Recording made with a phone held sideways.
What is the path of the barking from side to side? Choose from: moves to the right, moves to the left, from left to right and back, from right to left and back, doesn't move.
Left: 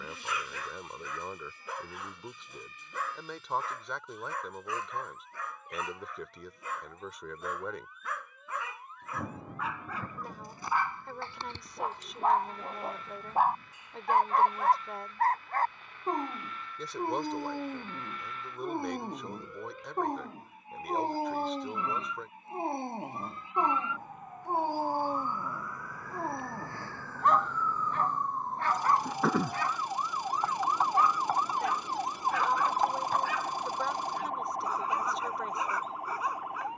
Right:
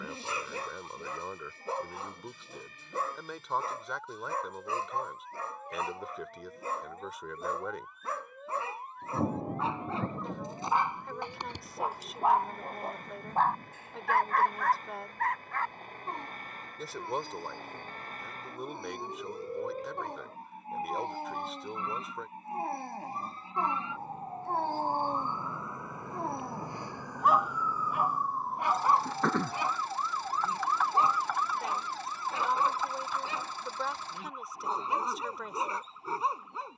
from right to left and back.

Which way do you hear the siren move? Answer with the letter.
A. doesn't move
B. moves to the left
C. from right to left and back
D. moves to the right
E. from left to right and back
B.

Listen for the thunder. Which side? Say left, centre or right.
right.